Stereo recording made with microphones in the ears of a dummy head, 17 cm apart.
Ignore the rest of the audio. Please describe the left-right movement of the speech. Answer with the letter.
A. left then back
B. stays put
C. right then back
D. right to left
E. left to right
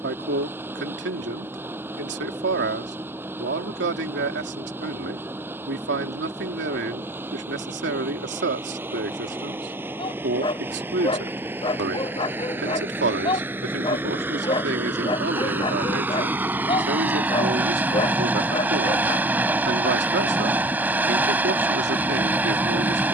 B.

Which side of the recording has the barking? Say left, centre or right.
left.